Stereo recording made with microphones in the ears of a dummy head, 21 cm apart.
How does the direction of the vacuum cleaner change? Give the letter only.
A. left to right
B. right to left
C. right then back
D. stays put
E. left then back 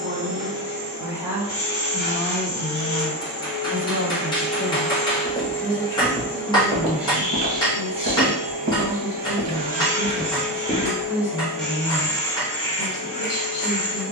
C.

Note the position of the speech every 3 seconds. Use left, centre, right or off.
centre, left, left, left, left.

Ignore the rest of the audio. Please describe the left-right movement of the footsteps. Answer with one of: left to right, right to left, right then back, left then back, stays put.
right then back.